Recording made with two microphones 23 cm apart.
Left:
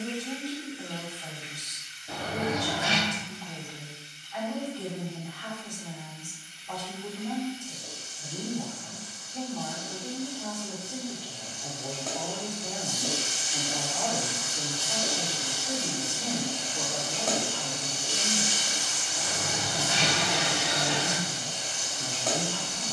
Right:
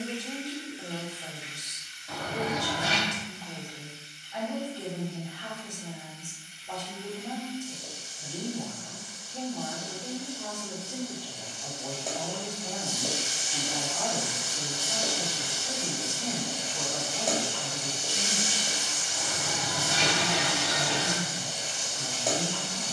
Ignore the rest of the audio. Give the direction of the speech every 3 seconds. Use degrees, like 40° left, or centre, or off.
20° right, 20° right, 20° right, 10° right, 20° left, 30° left, 30° left, 30° left.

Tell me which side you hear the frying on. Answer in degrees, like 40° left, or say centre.
10° right.